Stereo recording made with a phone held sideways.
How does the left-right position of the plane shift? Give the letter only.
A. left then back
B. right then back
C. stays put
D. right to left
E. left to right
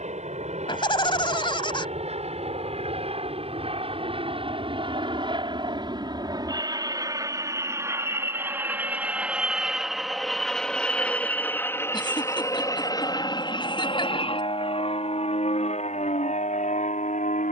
D.